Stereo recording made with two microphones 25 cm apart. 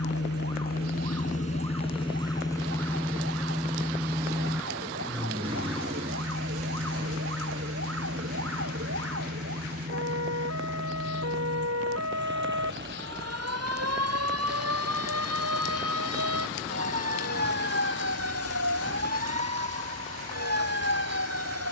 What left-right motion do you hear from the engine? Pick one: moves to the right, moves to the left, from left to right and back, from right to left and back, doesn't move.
moves to the right.